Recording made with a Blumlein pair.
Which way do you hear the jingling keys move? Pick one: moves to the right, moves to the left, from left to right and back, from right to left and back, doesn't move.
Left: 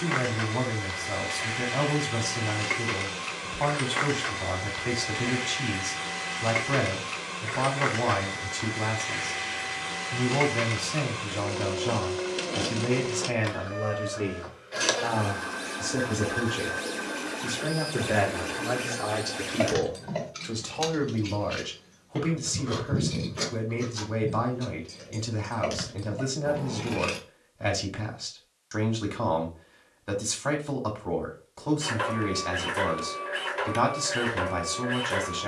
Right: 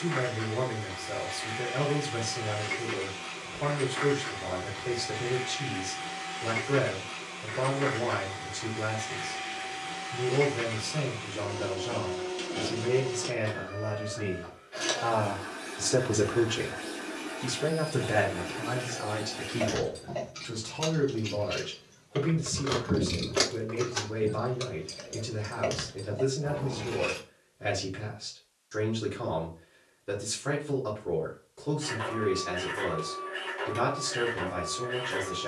from left to right and back.